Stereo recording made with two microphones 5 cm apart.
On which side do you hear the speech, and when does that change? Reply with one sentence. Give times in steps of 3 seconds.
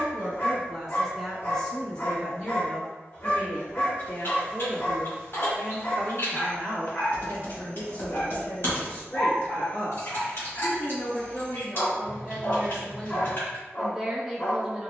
In this clip you hear the speech in the centre from 0 s, on the left from 3 s and in the centre from 12 s.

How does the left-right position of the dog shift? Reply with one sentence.
In this clip you hear the dog stay in one place.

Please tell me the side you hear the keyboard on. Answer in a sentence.
In this clip you hear the keyboard on the left.